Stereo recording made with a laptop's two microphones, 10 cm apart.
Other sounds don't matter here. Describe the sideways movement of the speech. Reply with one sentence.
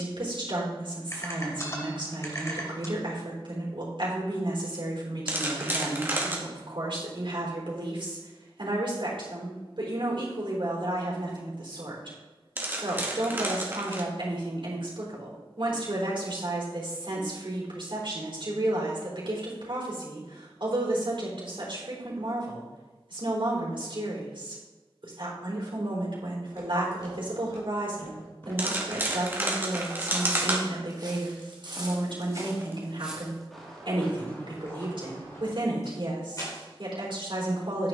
You can hear the speech stay in one place.